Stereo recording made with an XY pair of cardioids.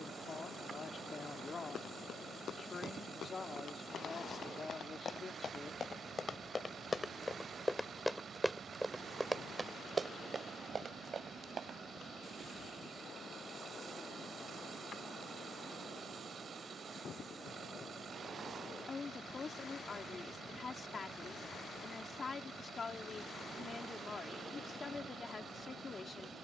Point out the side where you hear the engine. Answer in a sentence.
You can hear the engine on the right.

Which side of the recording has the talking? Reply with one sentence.
You can hear the talking on the left.